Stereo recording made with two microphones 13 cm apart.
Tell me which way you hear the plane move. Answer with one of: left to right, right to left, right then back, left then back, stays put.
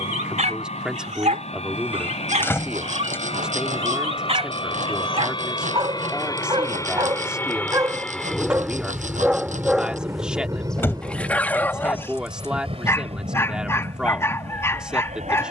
left to right.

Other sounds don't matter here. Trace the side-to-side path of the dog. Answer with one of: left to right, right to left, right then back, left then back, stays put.
right to left.